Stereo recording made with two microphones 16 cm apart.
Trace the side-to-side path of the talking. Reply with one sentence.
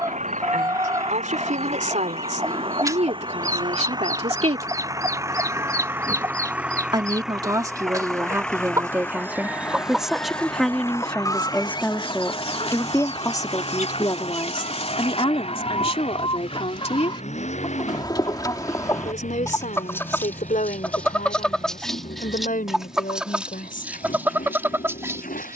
In this clip you hear the talking move to the left.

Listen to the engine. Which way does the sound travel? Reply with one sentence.
In this clip you hear the engine move to the left.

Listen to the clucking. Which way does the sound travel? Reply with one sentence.
In this clip you hear the clucking go left and come back.